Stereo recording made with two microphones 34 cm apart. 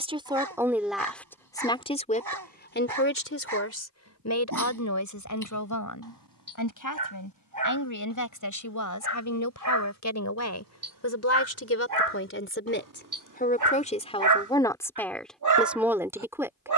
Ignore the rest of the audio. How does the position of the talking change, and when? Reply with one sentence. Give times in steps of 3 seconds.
In this clip you hear the talking in the centre from 0 s, on the left from 3 s and in the centre from 15 s.